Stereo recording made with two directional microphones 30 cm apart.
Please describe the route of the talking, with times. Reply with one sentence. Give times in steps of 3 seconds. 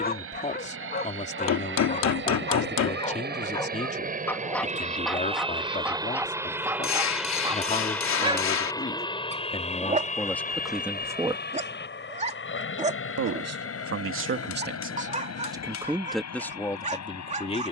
You can hear the talking on the left from 0 s, in the centre from 9 s, on the right from 12 s and in the centre from 15 s.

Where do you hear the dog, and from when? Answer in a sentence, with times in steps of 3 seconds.
You can hear the dog on the left from 0 s, in the centre from 3 s and on the right from 9 s.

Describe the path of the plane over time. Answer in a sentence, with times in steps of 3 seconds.
You can hear the plane on the right from 0 s, in the centre from 6 s and on the left from 9 s.